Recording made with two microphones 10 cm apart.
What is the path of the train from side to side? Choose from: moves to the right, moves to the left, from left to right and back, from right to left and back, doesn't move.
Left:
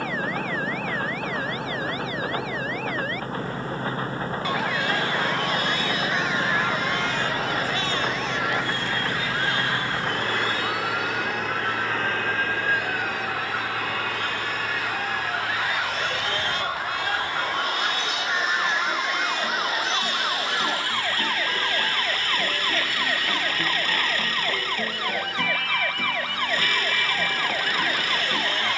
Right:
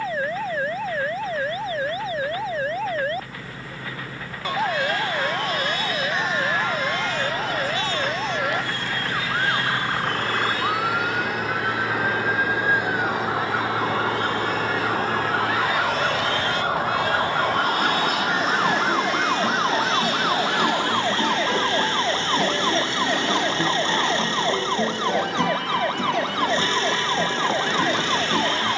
moves to the right.